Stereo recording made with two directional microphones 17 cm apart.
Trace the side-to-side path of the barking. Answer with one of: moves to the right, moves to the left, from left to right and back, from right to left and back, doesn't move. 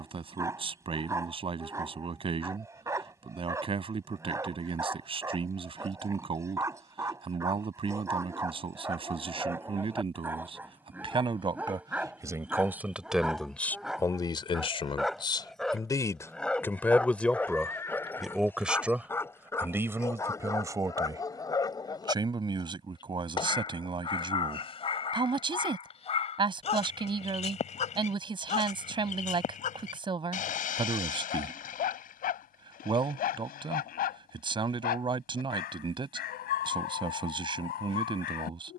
moves to the left.